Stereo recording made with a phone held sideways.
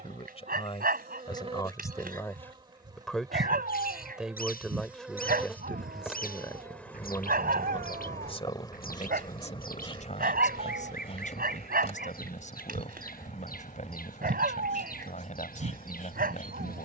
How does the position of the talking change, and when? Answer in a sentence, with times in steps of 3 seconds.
You can hear the talking on the left from 0 s, in the centre from 3 s and on the left from 6 s.